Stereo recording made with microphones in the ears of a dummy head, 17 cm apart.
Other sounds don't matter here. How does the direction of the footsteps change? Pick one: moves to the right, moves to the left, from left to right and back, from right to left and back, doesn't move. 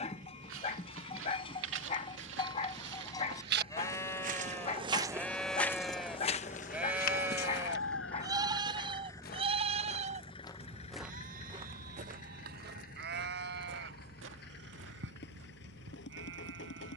from right to left and back.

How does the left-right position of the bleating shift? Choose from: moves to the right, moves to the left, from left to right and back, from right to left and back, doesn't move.
moves to the right.